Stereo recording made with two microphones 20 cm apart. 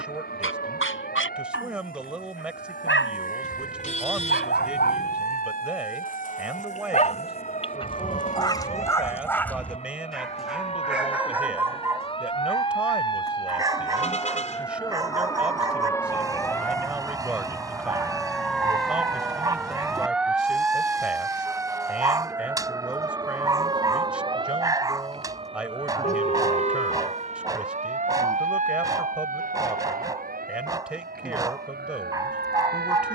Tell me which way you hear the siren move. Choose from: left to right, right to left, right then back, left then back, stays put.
left to right.